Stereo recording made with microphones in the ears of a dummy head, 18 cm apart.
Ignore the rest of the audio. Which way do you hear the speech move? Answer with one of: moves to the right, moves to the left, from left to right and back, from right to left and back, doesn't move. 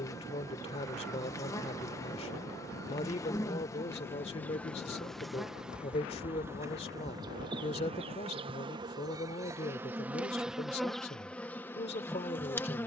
doesn't move.